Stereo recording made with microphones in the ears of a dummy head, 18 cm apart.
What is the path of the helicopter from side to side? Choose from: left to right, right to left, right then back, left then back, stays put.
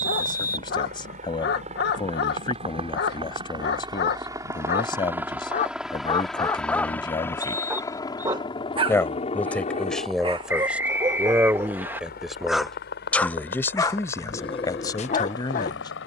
right to left.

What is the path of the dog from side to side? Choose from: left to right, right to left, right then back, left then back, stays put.
right then back.